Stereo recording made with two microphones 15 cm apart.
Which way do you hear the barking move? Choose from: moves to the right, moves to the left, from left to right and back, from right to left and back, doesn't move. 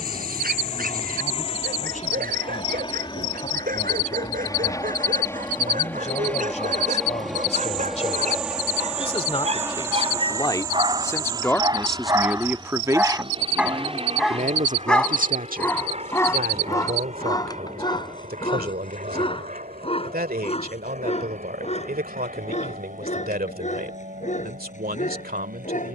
moves to the left.